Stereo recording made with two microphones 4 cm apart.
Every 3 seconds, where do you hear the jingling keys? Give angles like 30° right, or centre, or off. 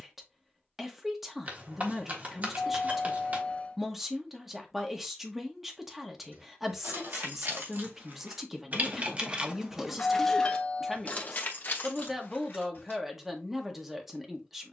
off, off, 60° right, 10° left, 60° left.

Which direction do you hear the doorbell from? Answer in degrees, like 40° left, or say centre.
30° left.